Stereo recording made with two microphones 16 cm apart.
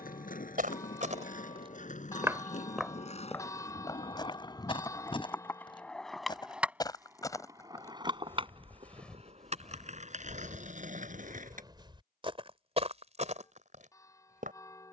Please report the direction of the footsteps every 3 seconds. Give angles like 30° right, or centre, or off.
30° right, 30° left, 20° left, 10° right, 50° right.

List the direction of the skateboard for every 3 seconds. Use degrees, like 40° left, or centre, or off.
60° left, 30° left, 20° right, 50° right, off.